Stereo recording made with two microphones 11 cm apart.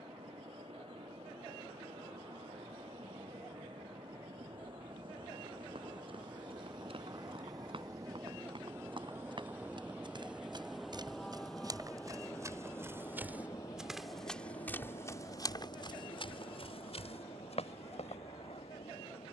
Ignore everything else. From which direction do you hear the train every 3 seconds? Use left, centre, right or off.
right, right, right, centre, left, left, left.